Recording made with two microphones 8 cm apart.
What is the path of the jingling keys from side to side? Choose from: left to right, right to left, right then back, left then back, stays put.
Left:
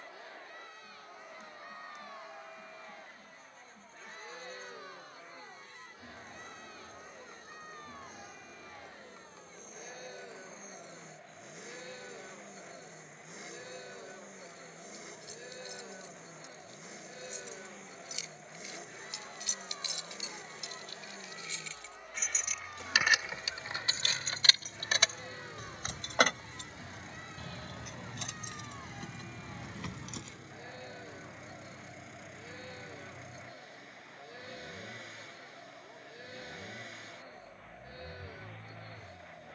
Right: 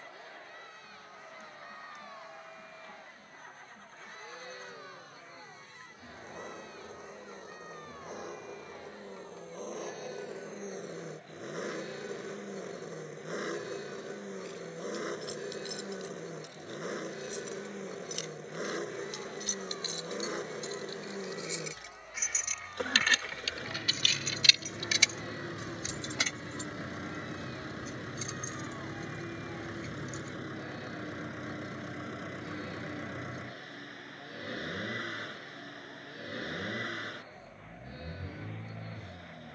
right to left.